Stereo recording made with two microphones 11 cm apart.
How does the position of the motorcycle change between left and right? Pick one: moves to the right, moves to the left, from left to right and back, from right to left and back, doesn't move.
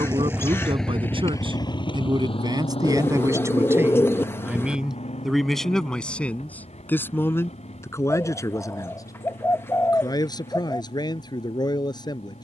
moves to the left.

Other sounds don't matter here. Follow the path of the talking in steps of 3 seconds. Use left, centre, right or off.
right, centre, left, left.